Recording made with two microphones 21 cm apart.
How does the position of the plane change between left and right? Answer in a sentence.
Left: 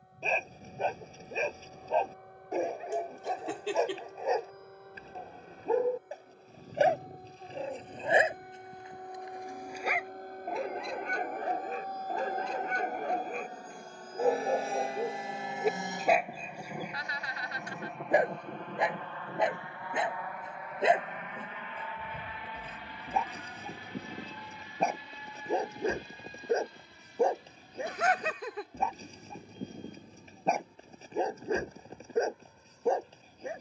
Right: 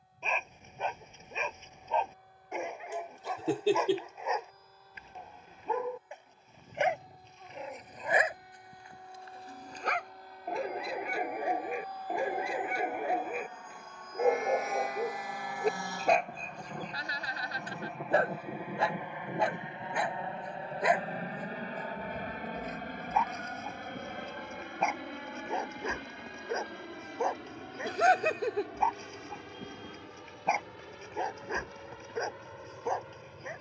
In this clip you hear the plane go from the left side to the right.